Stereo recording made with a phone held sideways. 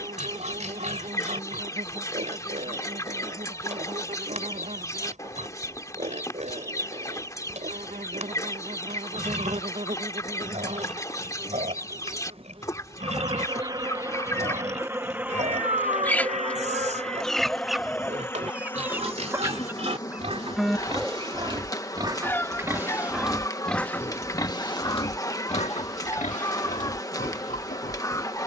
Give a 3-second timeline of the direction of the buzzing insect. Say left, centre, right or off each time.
right, right, right, right, right, centre, left, left, left, left.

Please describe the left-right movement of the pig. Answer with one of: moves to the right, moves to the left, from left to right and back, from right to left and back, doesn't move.
moves to the left.